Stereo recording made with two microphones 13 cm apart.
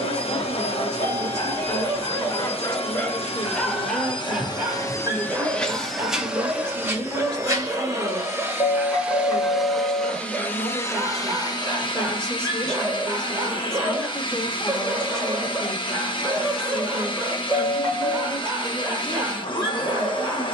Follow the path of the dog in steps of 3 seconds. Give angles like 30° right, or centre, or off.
40° left, 10° right, 20° right, 20° right, 20° right, 20° right, 20° right.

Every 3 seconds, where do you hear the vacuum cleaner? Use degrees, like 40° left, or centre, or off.
50° left, 30° left, 20° right, 20° left, 40° left, 40° left, 40° left.